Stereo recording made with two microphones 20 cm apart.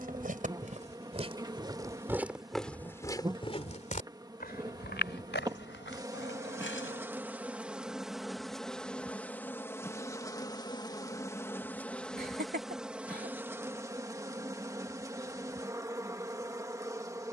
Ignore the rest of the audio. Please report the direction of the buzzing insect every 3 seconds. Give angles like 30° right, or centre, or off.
20° right, 20° right, 10° right, 10° left, 10° right, 20° right.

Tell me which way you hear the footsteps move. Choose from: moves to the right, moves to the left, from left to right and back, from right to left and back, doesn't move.
moves to the left.